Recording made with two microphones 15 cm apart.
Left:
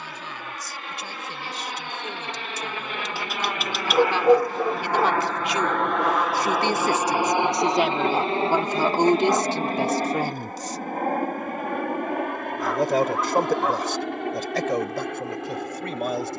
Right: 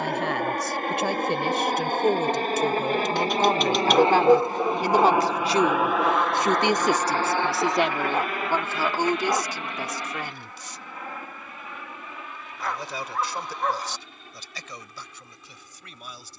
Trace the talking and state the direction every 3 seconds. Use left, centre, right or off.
right, right, centre, left, left, left.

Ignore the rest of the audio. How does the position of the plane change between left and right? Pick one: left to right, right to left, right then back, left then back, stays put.
right to left.